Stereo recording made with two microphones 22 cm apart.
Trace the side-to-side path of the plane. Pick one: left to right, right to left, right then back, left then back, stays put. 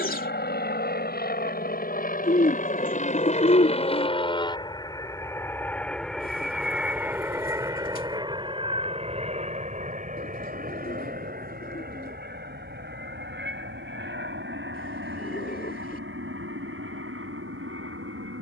left to right.